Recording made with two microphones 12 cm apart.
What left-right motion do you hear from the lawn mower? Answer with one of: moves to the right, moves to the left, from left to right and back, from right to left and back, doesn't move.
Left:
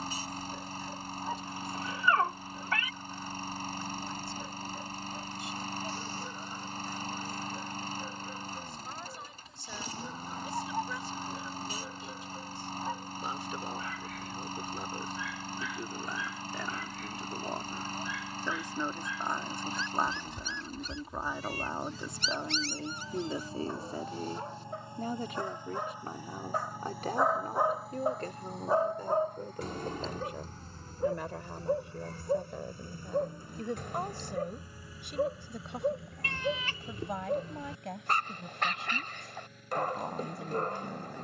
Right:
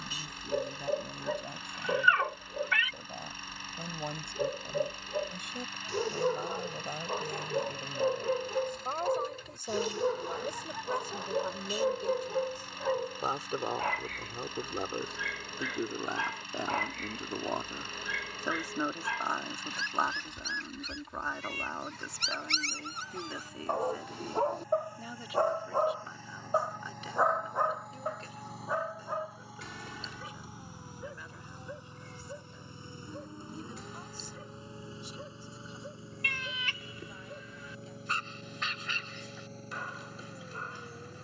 moves to the right.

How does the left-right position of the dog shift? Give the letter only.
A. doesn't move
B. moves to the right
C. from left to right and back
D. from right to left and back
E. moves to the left
E.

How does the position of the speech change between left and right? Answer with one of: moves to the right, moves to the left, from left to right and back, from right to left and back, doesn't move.
moves to the left.